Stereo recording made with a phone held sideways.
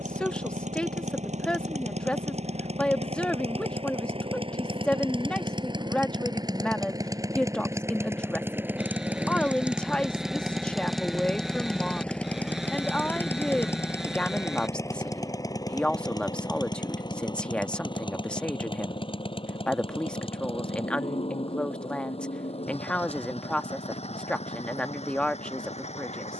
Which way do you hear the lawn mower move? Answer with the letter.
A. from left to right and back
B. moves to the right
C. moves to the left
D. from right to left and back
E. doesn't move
C.